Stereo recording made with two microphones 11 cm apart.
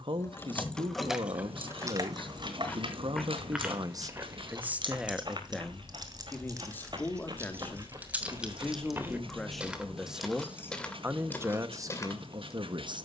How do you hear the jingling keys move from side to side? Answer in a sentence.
You can hear the jingling keys go right and come back.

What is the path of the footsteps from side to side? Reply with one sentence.
In this clip you hear the footsteps move from left to right and back again.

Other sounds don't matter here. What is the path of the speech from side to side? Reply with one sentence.
You can hear the speech move from right to left and back again.